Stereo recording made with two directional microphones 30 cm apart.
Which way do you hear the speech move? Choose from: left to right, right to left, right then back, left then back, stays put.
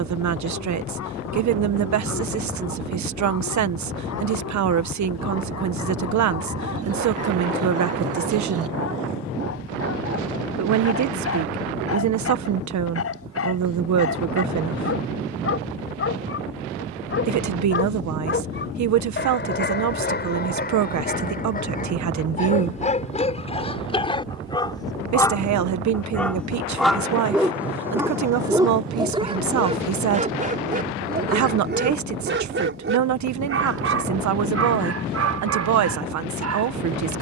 stays put.